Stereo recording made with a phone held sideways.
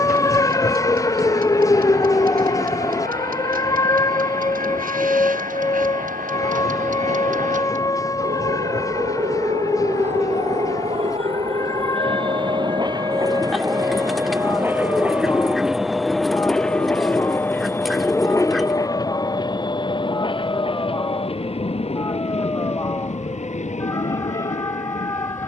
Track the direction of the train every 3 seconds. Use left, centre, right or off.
right, right, right, right, right, centre, left, left, left.